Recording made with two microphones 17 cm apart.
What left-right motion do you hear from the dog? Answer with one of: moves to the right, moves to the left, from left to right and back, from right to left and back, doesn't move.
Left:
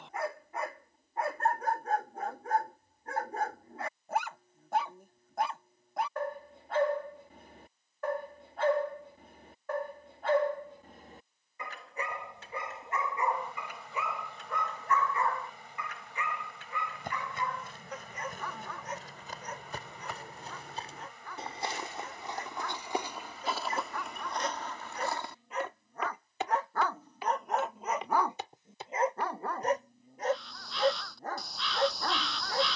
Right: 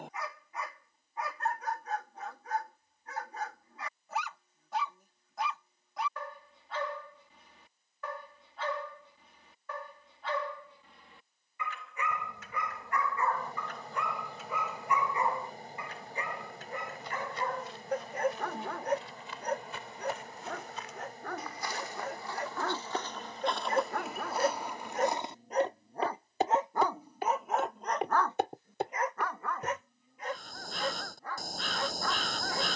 from left to right and back.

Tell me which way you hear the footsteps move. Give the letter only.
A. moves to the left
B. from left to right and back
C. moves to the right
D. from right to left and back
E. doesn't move
C.